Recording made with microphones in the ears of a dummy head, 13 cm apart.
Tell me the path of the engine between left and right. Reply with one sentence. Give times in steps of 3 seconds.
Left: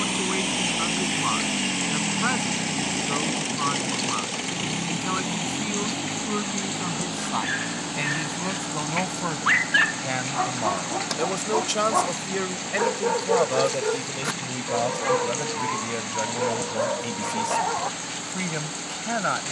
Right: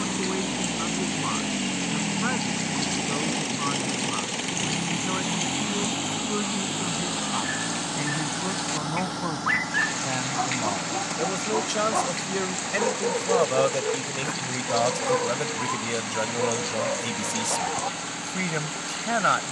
You can hear the engine on the left from 0 s, in the centre from 3 s and on the right from 6 s.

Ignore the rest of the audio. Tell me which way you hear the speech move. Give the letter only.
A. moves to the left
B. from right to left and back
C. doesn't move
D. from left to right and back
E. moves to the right
E.